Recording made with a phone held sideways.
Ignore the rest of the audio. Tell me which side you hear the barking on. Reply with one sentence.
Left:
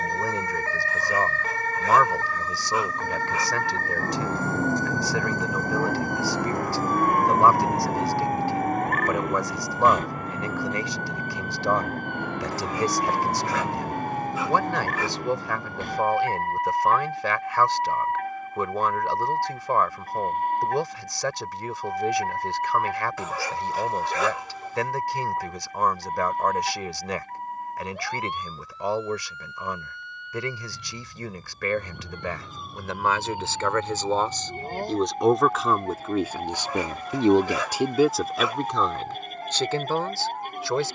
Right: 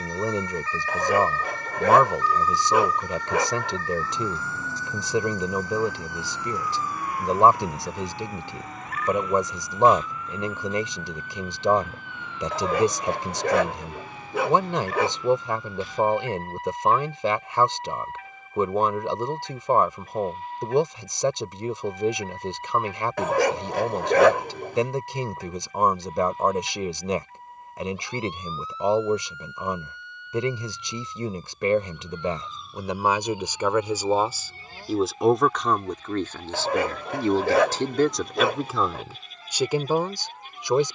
You can hear the barking on the right.